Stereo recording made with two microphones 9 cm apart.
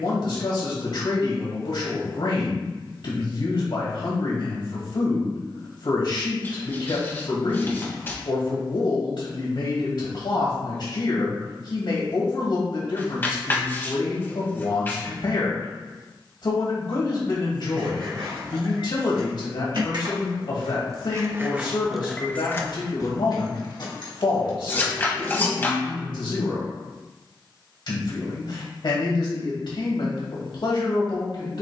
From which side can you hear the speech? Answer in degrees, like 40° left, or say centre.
60° left.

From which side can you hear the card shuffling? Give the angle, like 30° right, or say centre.
30° left.